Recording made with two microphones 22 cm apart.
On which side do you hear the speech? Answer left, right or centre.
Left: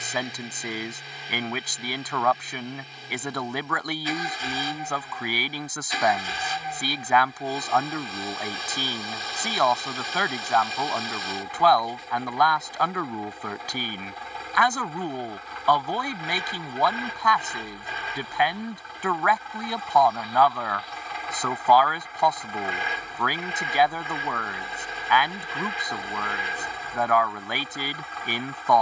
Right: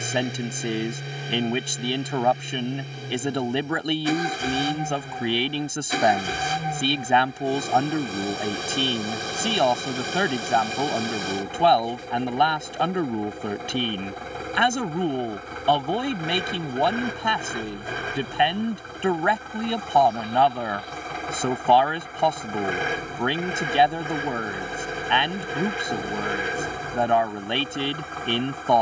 right.